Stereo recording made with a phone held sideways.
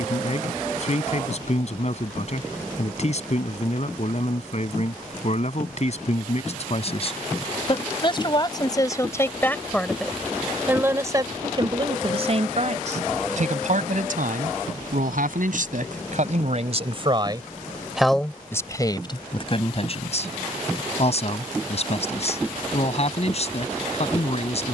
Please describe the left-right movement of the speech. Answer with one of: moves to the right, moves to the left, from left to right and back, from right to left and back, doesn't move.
from left to right and back.